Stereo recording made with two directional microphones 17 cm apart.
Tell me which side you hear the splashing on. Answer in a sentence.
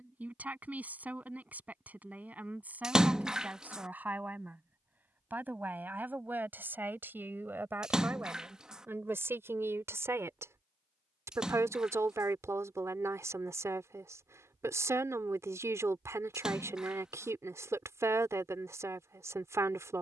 You can hear the splashing in the centre.